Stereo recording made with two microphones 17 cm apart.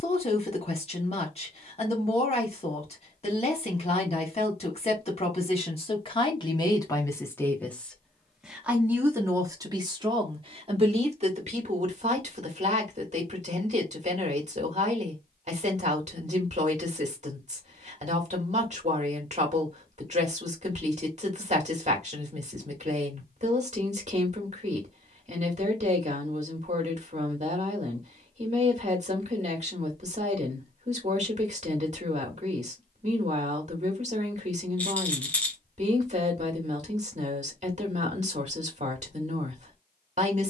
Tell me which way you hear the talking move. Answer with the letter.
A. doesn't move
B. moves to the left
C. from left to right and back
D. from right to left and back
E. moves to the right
E.